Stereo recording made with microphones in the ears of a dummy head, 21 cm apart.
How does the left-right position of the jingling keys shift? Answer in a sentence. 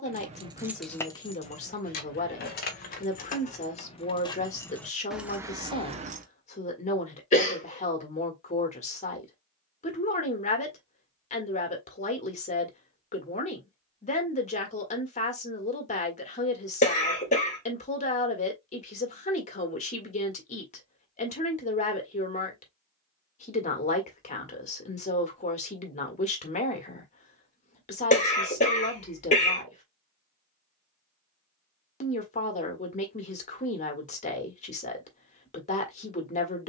You can hear the jingling keys move from right to left and back again.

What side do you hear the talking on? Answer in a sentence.
In this clip you hear the talking on the left.